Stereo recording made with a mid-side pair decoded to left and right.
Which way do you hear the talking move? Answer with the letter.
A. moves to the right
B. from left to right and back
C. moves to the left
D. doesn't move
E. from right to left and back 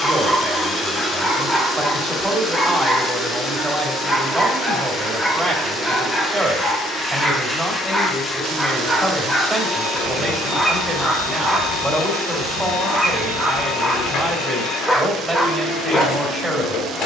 D.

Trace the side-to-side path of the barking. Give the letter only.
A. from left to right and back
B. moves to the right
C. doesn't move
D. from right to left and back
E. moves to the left
C.